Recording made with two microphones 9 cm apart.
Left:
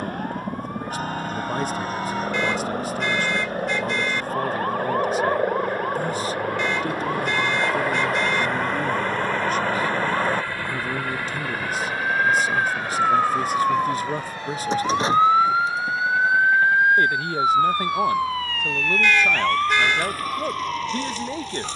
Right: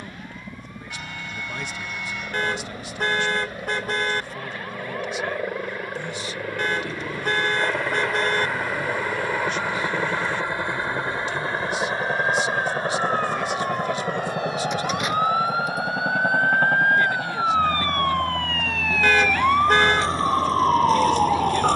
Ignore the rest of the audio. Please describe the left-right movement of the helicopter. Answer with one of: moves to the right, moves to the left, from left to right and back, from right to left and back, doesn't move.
moves to the right.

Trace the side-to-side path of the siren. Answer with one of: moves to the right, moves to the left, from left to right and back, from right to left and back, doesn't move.
moves to the right.